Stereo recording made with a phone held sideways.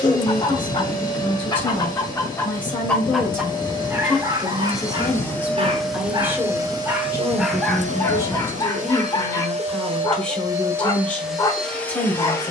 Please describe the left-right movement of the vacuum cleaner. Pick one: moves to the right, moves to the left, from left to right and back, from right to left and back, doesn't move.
from left to right and back.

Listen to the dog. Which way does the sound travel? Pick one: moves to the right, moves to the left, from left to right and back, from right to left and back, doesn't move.
from left to right and back.